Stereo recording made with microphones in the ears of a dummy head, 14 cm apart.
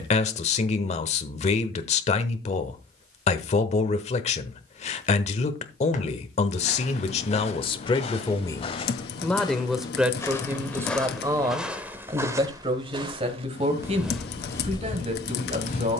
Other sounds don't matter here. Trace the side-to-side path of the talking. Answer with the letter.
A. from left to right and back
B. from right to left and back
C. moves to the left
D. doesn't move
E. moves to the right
E.